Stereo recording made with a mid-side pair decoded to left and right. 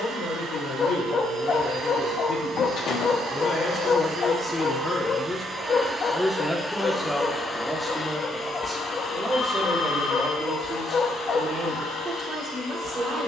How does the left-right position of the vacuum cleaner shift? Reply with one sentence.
You can hear the vacuum cleaner move to the left.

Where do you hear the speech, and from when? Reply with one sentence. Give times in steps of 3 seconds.
In this clip you hear the speech on the left from 0 s, in the centre from 6 s and on the right from 9 s.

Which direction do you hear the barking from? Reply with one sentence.
In this clip you hear the barking on the left.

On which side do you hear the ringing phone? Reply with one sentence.
In this clip you hear the ringing phone on the left.